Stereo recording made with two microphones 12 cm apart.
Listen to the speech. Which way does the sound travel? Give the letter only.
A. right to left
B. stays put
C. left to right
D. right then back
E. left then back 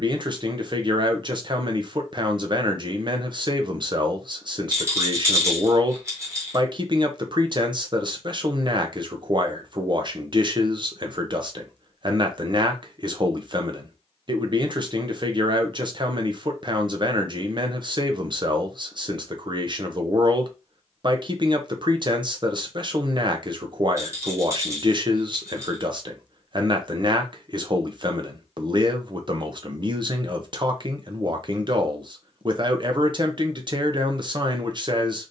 B.